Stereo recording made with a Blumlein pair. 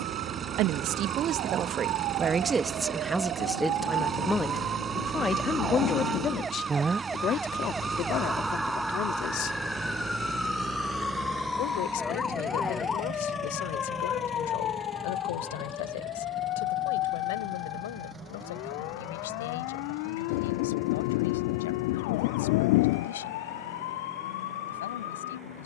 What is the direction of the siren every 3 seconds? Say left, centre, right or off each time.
right, right, centre, centre, left, left, left, left, left.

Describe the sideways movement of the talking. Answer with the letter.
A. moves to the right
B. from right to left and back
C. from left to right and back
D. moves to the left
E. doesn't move
D.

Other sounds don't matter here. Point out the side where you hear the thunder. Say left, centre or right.
left.